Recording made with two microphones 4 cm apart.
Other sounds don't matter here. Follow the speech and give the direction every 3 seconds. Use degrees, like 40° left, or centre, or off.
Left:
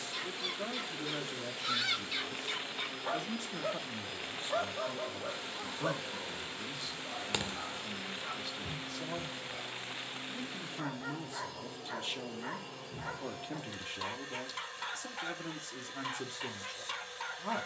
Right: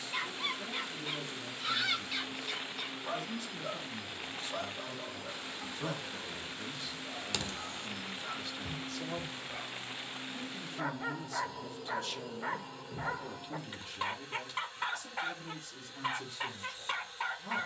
60° left, 30° left, centre, 20° left, 40° left, 50° left.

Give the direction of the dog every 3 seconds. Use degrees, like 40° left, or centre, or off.
20° right, 40° left, 20° left, 30° right, 30° right, 30° right.